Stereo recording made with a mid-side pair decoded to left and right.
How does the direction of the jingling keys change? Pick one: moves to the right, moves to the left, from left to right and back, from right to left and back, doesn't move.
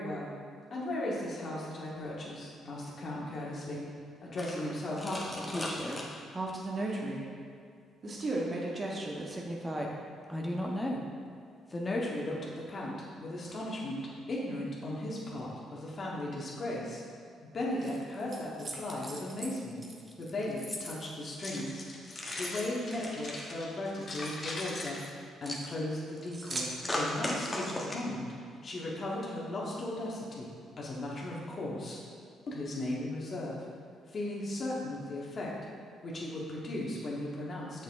from right to left and back.